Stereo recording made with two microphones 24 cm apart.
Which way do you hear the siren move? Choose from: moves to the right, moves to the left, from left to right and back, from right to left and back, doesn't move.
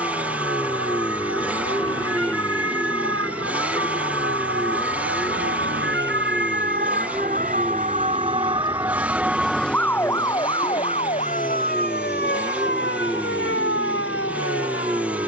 moves to the left.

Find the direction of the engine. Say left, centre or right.
centre.